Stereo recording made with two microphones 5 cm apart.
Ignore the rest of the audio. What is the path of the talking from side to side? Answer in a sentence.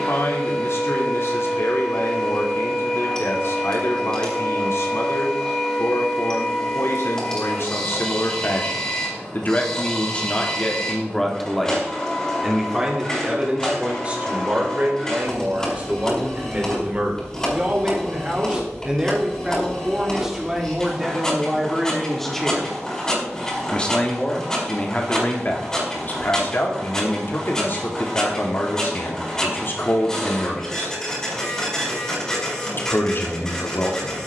You can hear the talking go right and come back.